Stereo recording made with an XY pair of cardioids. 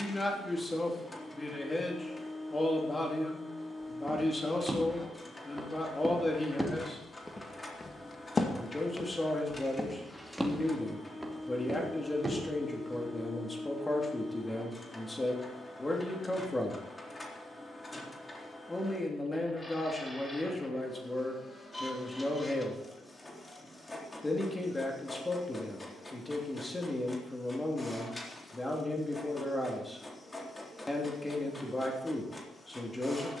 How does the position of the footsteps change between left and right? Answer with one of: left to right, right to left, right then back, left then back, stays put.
left then back.